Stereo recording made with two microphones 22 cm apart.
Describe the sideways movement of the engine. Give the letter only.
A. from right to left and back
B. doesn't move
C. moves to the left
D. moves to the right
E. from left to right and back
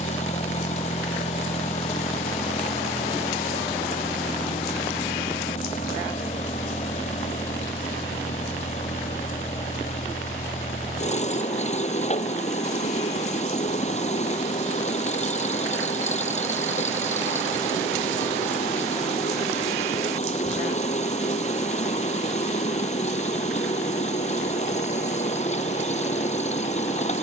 B.